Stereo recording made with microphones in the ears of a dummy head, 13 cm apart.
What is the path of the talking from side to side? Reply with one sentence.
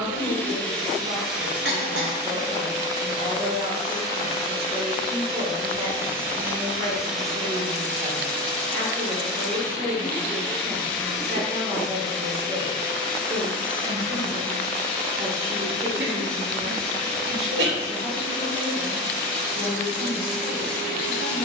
In this clip you hear the talking stay put.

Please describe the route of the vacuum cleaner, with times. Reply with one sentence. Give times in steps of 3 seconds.
In this clip you hear the vacuum cleaner in the centre from 0 s, on the right from 3 s and in the centre from 6 s.